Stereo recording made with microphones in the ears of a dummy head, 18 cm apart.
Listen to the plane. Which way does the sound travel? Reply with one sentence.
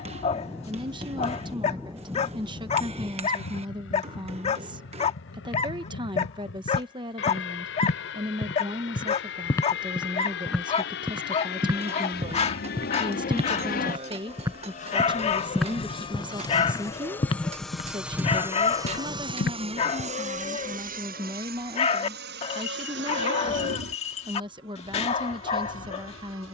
In this clip you hear the plane travel towards the right.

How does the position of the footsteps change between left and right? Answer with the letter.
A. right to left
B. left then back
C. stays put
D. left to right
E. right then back
E.